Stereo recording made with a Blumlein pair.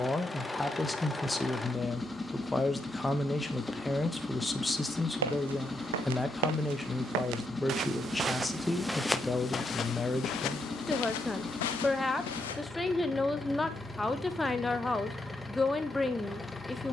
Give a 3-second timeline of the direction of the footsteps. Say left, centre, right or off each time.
off, right, right, left, left, off.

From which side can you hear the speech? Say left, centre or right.
centre.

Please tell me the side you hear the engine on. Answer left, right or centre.
centre.